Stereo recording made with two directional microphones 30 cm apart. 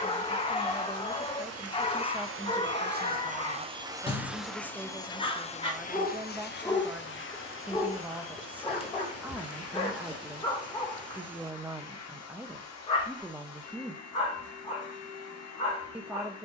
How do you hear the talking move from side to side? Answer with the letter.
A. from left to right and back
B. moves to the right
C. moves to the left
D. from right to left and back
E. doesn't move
E.